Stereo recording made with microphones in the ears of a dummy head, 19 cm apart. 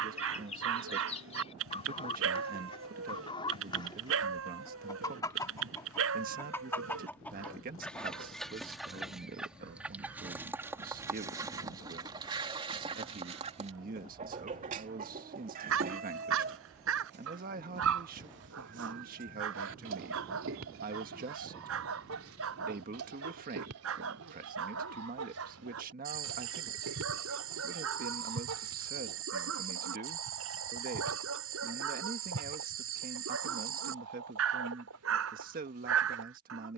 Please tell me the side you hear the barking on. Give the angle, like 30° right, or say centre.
70° right.